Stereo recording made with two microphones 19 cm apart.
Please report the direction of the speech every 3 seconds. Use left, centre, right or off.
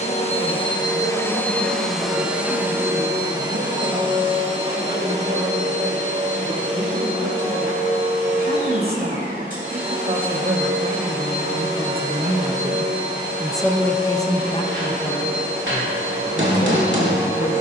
right, right, right, right, centre, left.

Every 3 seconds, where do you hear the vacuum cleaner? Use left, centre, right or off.
centre, right, right, right, right, right.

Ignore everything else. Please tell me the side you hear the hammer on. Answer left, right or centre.
right.